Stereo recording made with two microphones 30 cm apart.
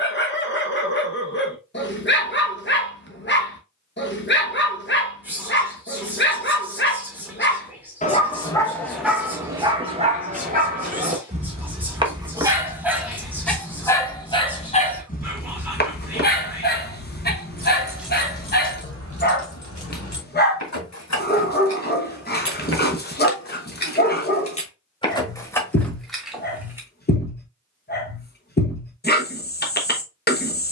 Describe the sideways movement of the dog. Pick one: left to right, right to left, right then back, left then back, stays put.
right then back.